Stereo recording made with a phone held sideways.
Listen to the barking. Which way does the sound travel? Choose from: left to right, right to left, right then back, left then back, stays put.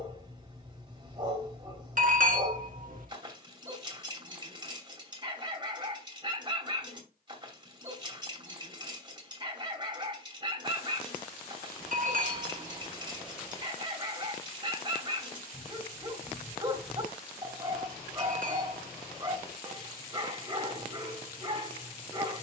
stays put.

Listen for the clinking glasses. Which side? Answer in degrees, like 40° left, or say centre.
60° right.